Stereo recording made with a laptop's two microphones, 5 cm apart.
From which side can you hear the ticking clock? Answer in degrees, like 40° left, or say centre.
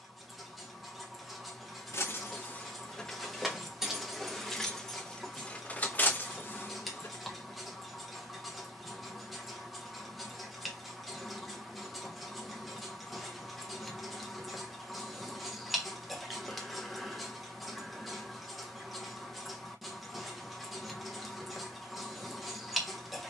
centre.